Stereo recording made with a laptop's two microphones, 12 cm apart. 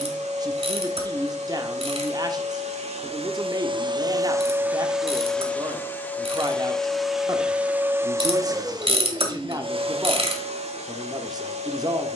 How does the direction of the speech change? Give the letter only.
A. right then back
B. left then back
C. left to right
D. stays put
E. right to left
D.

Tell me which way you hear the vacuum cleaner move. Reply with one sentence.
You can hear the vacuum cleaner move from right to left and back again.